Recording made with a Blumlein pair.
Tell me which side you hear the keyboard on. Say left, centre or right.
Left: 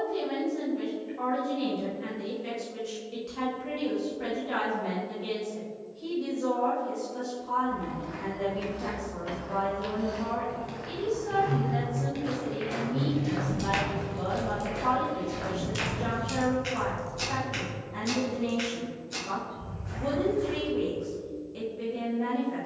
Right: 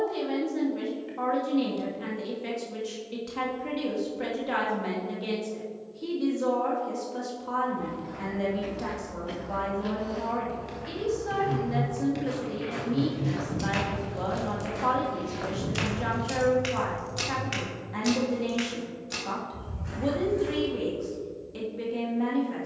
centre.